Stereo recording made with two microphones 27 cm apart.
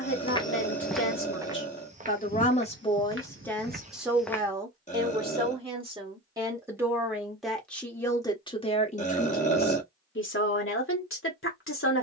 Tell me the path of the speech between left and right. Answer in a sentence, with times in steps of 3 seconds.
You can hear the speech on the left from 0 s, in the centre from 3 s and on the left from 9 s.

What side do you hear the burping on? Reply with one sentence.
You can hear the burping on the left.